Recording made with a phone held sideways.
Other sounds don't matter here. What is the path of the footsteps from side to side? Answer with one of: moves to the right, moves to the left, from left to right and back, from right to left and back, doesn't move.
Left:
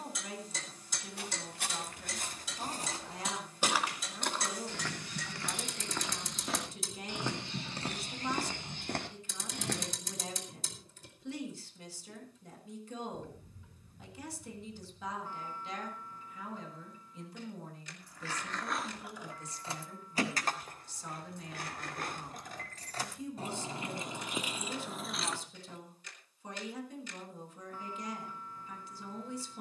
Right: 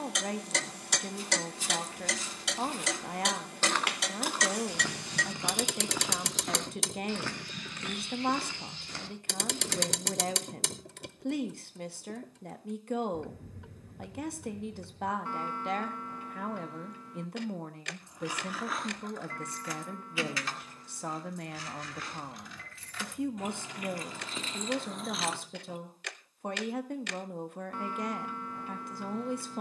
from left to right and back.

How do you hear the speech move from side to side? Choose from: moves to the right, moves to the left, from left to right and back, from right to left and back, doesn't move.
doesn't move.